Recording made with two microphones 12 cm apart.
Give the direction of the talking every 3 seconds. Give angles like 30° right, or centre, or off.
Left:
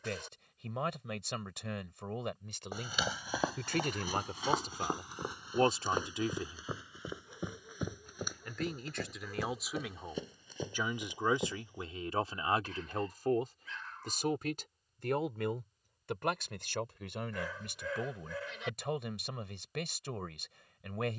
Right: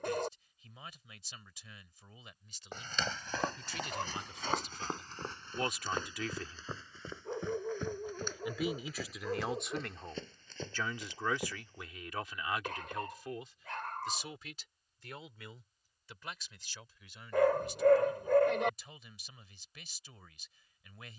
80° left, 50° left, 10° left, 10° left, 50° left, 70° left, 80° left.